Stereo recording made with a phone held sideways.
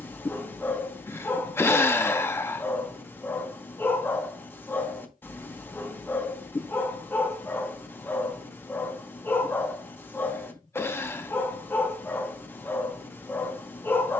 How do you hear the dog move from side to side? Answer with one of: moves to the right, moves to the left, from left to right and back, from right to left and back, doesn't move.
doesn't move.